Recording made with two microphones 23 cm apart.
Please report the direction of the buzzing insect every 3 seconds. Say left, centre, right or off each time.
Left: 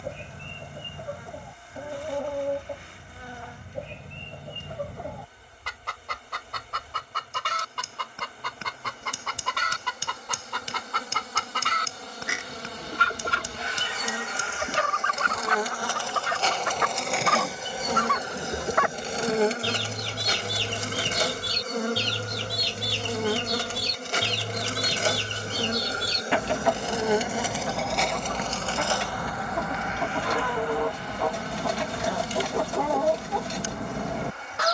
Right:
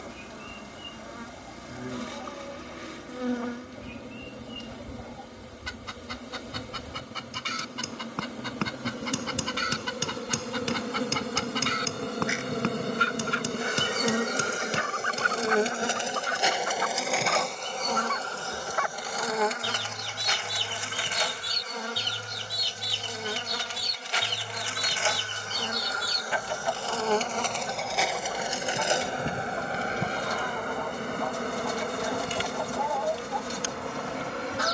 right, right, right, right, right, centre, left, left, left, centre, right, right.